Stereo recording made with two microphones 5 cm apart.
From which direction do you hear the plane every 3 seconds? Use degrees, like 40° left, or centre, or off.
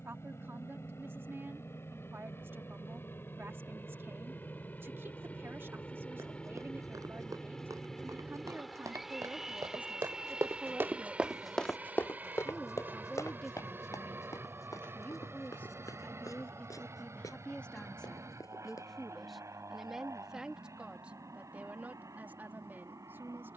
50° left, 30° left, 10° left, 20° right, 40° right, 50° right, 60° right, 60° right.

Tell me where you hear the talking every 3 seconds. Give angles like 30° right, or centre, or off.
40° right, 40° right, 40° right, 20° right, 10° left, 30° left, centre, 30° right.